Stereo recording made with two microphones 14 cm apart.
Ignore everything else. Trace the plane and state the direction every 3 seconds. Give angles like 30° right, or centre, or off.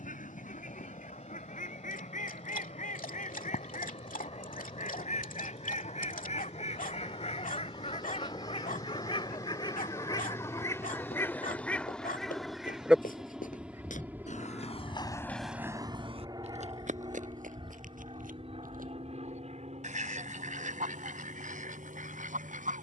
50° left, 40° left, 30° left, 20° left, 10° right, 30° right, 50° right, 60° right.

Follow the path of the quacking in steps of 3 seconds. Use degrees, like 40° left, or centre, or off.
70° left, 60° left, 50° left, 20° left, 10° right, 50° right, 60° right, 70° right.